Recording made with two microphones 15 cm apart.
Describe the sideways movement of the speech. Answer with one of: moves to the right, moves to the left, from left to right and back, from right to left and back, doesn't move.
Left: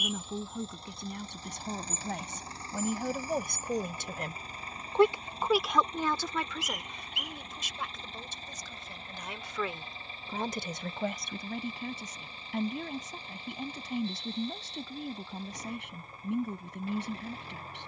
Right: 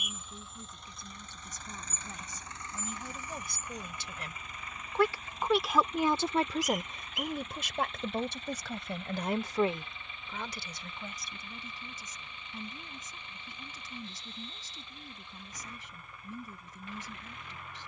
from left to right and back.